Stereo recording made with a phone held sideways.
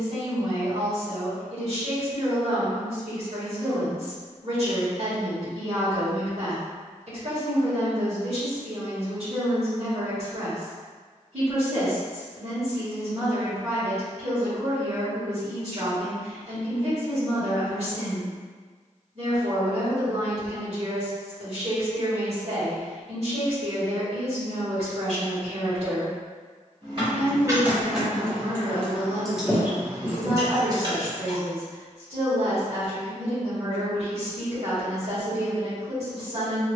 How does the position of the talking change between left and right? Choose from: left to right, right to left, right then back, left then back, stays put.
stays put.